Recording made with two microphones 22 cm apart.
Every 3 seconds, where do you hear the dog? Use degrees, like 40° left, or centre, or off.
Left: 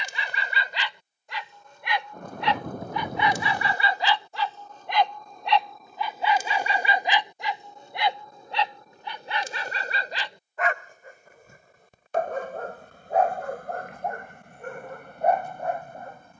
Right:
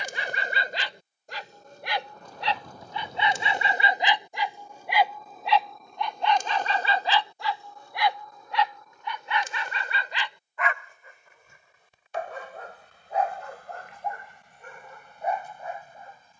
40° right, 20° right, 20° left, 40° left, 60° left, 60° left.